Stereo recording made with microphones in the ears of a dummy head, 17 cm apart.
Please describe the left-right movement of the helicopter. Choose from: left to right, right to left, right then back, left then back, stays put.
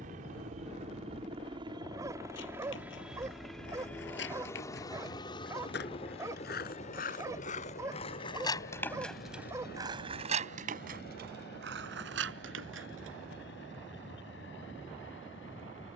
right to left.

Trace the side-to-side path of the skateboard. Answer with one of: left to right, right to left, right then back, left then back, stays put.
left to right.